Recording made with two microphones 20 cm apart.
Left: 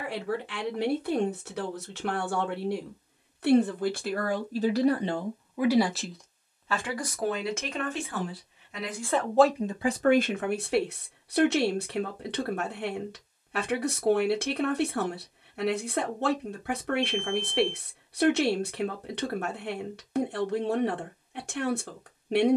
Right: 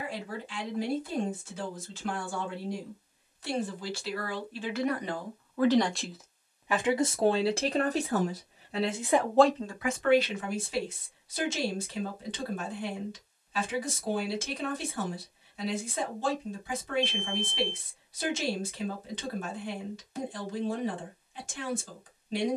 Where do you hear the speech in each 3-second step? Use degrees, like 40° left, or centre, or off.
60° left, 30° left, 30° right, 40° left, 60° left, 60° left, 60° left, 60° left.